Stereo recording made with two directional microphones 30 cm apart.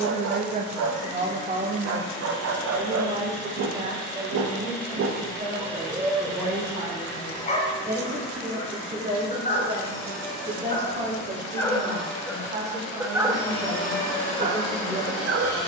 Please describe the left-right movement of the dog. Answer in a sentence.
In this clip you hear the dog go left and come back.